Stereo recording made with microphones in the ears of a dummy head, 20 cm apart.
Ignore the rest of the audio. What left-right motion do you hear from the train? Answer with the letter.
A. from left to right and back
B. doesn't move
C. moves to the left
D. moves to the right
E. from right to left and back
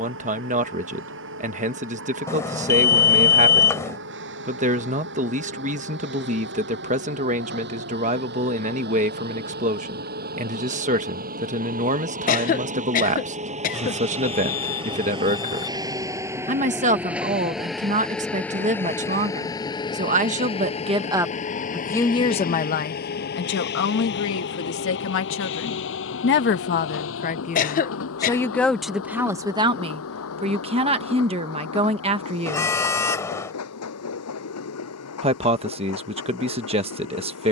C.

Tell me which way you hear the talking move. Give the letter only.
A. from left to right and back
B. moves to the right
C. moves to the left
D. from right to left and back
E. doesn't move
D.